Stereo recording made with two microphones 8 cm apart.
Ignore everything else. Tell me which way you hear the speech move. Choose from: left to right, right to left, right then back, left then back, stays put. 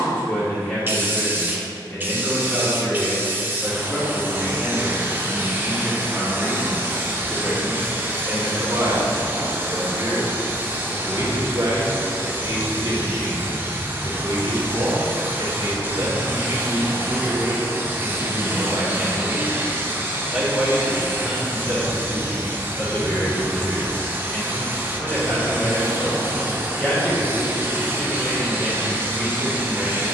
right then back.